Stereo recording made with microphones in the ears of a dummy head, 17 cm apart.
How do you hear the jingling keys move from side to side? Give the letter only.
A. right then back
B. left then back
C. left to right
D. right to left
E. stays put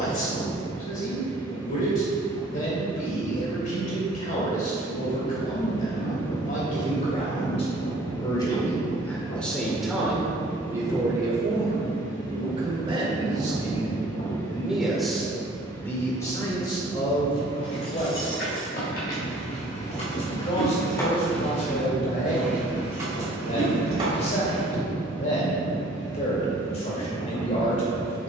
C.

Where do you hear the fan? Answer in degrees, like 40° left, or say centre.
70° left.